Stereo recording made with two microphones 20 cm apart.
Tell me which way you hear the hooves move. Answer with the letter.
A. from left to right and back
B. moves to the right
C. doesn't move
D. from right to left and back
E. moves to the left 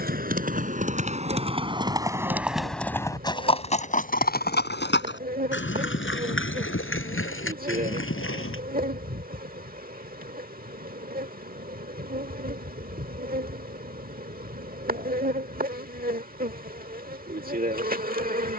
E.